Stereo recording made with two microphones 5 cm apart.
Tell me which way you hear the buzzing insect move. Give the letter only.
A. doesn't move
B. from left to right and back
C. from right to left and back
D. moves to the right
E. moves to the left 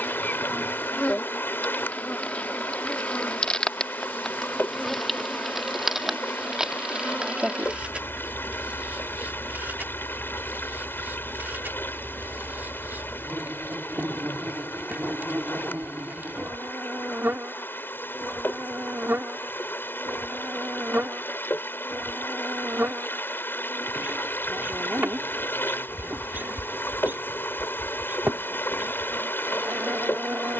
D.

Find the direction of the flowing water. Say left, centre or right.
left.